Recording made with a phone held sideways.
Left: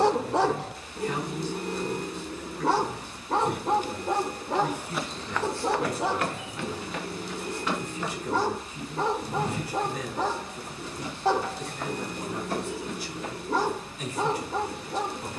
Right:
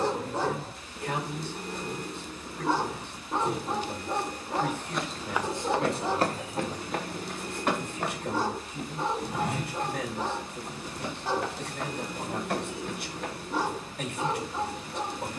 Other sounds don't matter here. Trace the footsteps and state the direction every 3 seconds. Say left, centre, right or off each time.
off, centre, right, right, right.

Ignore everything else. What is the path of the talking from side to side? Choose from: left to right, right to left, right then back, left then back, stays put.
stays put.